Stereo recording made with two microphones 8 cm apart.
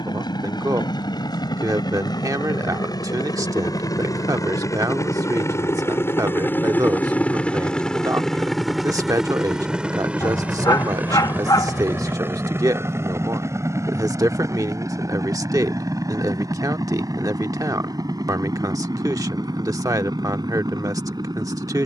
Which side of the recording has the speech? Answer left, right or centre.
right.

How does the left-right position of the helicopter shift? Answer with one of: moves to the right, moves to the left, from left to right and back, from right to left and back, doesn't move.
moves to the right.